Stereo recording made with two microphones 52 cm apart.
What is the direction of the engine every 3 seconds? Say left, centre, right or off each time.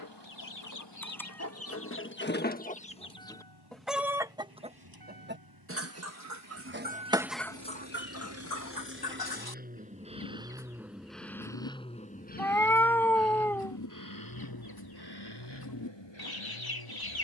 right, right, right, centre, left, left.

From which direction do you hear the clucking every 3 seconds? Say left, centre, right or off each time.
left, centre, centre, left, left, left.